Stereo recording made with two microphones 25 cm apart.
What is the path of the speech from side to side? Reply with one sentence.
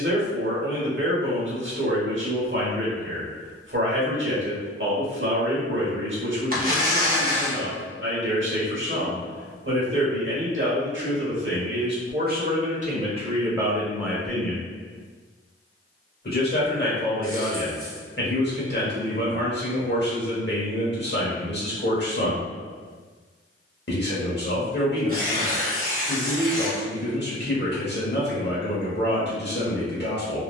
You can hear the speech move from right to left.